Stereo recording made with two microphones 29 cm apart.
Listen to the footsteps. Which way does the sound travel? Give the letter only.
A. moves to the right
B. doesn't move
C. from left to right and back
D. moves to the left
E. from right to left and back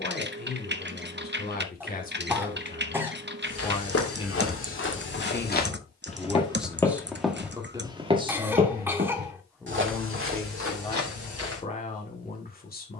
A.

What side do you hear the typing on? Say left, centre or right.
right.